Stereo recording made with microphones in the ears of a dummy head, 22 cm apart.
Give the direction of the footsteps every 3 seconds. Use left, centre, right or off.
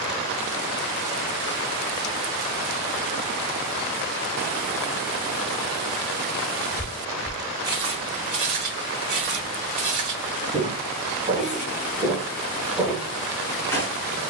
off, off, right, right, centre.